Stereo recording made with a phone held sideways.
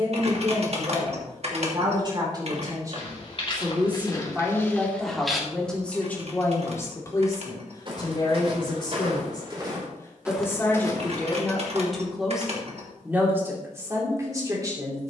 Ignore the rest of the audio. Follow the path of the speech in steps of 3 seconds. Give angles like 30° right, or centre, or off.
30° right, 10° right, 30° left, 10° left, 20° right.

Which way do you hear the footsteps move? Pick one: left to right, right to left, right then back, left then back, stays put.
right then back.